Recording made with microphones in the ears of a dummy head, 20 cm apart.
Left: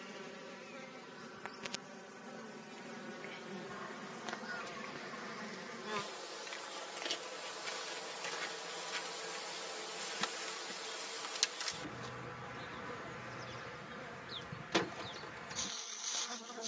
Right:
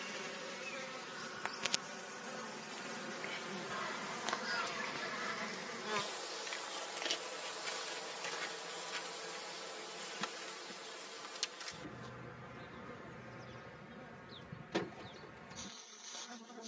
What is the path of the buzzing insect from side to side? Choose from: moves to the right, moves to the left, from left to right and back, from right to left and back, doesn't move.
moves to the left.